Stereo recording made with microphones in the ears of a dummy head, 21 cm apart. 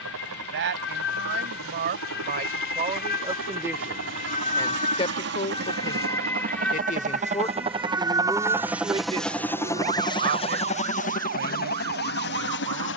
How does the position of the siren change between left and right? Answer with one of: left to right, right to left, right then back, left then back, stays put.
left to right.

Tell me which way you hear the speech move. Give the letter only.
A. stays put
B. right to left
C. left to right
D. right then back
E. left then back
E.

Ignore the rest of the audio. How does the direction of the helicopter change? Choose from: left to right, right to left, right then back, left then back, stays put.
right to left.